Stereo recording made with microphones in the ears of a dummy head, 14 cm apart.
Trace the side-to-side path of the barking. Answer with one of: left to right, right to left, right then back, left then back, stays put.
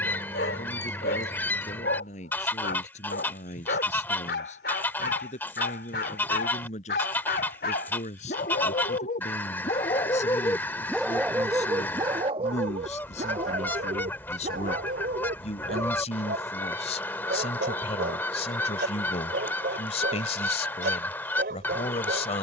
left to right.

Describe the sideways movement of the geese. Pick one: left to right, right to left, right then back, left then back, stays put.
stays put.